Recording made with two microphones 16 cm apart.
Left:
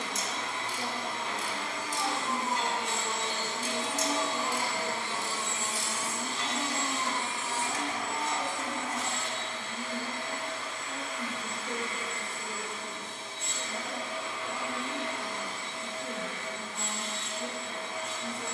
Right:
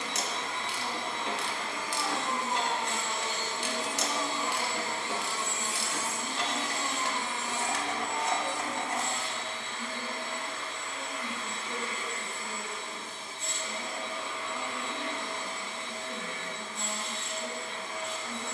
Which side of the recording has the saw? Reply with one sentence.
In this clip you hear the saw on the left.